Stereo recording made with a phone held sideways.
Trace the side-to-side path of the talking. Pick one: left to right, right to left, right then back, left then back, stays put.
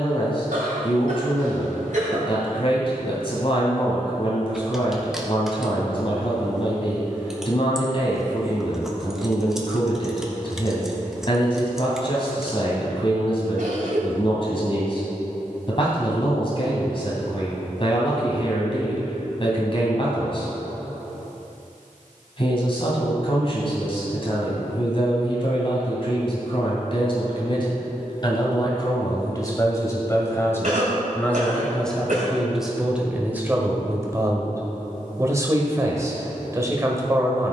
left to right.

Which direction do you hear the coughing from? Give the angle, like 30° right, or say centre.
70° right.